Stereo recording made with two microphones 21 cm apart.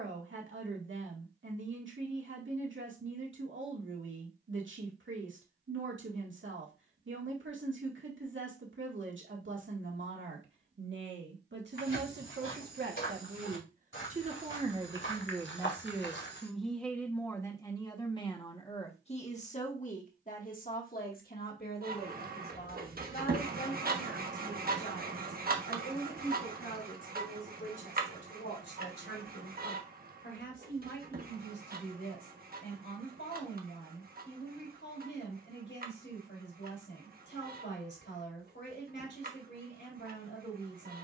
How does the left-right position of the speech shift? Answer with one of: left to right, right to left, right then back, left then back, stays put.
right to left.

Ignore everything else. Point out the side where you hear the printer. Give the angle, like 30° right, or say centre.
50° right.